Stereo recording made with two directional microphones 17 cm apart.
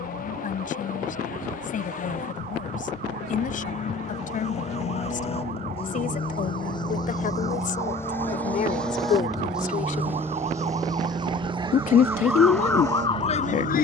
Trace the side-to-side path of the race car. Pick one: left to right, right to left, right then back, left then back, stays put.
left to right.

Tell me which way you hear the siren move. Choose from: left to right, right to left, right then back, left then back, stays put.
right to left.